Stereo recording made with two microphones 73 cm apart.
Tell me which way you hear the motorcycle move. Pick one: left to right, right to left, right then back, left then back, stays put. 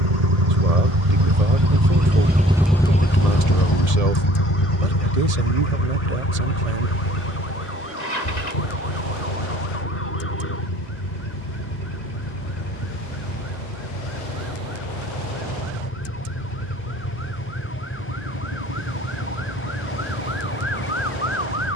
right to left.